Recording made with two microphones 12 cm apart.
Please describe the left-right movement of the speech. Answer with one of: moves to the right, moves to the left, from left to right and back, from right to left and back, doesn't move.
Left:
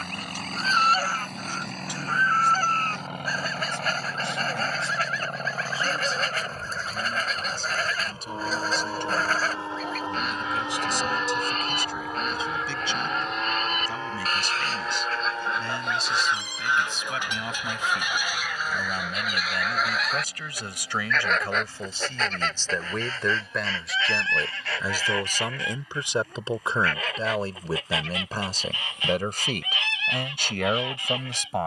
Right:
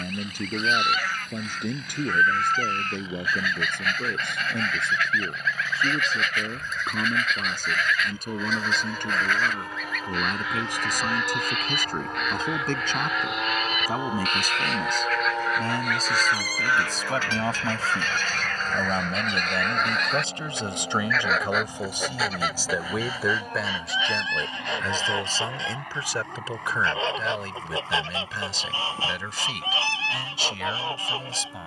moves to the left.